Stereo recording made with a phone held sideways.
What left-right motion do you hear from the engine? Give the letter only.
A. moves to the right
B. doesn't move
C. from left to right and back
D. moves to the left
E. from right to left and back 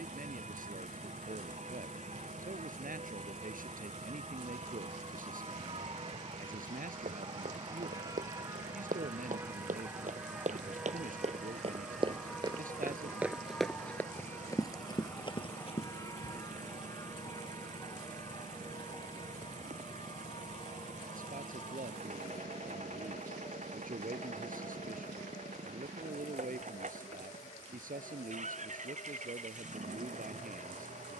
B.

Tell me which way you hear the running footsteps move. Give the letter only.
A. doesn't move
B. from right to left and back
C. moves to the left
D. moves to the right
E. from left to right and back
C.